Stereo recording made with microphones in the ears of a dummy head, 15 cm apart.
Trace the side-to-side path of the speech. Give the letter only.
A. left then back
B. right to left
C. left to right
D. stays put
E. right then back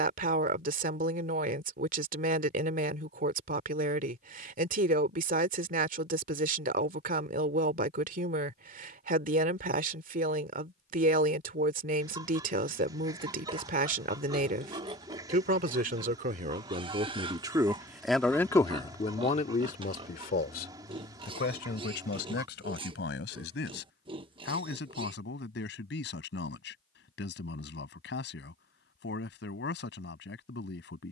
B.